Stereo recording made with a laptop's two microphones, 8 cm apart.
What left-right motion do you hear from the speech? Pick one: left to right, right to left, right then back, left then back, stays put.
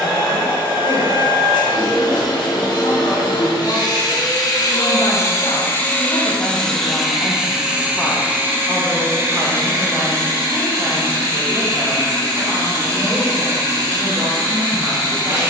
left to right.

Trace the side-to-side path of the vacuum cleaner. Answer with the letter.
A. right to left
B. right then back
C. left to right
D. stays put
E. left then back
C.